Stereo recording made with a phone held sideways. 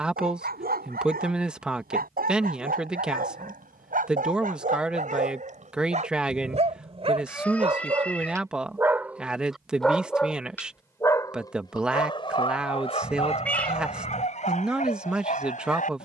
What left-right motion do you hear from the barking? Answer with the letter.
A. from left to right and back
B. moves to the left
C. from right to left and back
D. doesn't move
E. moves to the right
B.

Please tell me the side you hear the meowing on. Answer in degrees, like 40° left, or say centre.
10° left.